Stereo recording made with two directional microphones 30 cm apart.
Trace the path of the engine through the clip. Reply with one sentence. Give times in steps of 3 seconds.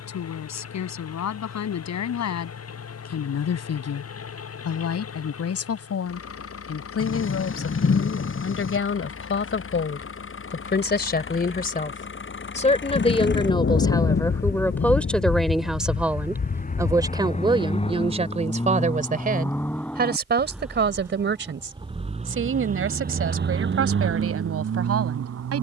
In this clip you hear the engine on the left from 0 s, in the centre from 18 s and on the right from 21 s.